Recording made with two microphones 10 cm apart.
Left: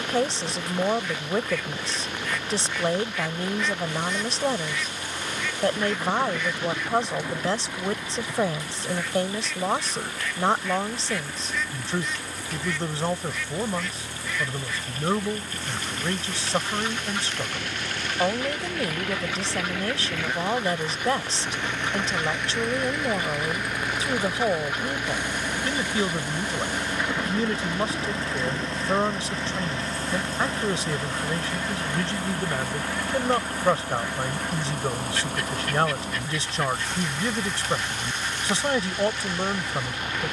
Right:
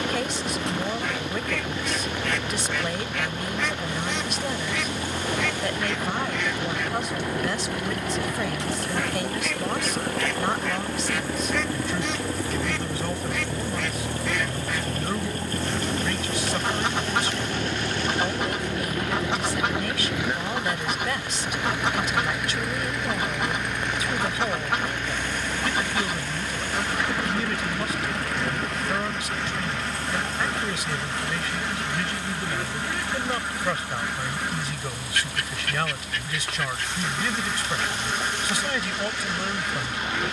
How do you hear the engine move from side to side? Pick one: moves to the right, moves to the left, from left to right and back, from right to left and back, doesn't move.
moves to the left.